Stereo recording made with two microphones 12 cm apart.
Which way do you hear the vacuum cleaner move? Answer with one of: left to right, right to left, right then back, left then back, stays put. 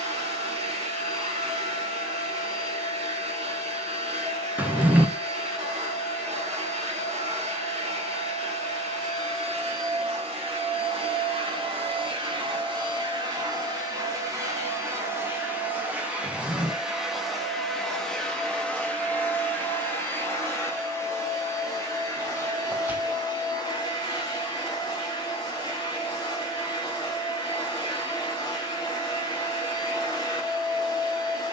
right to left.